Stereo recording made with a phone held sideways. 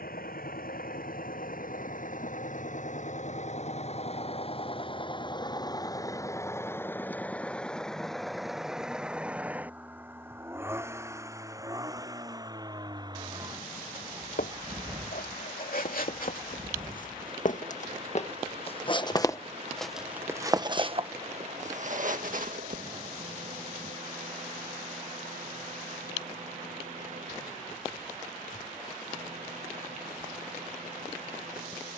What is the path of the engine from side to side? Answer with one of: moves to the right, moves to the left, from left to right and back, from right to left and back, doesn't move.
moves to the right.